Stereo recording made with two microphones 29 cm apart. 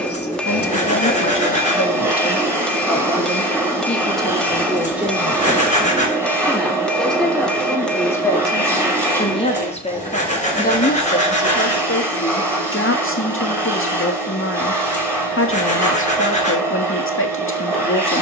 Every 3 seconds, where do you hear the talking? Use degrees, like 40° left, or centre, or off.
40° left, centre, 10° left, 30° left, 50° left, 50° left.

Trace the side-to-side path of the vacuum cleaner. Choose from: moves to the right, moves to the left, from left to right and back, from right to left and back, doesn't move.
doesn't move.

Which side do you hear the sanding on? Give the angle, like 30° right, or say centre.
20° left.